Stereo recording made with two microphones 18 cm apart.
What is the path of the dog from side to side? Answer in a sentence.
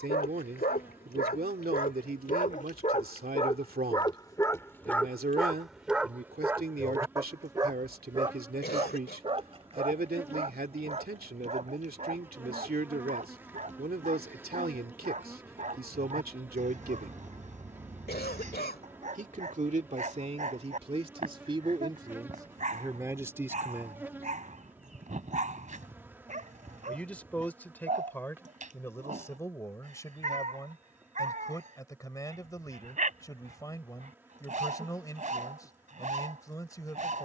In this clip you hear the dog go from the left side to the right.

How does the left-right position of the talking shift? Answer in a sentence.
In this clip you hear the talking move from right to left.